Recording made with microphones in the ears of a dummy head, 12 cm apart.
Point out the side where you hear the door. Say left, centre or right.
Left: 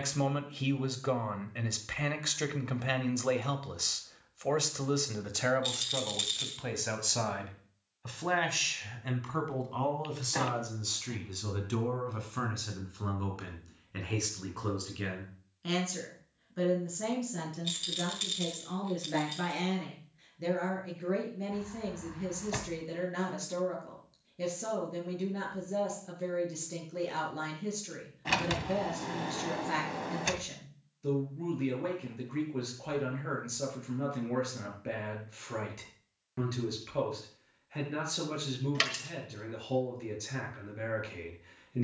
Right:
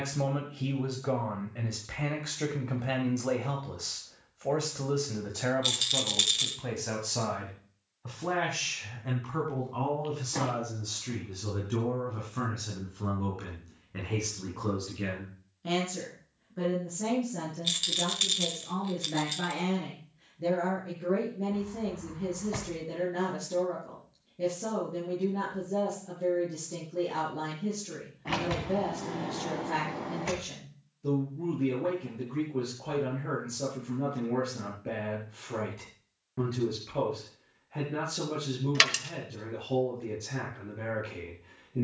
left.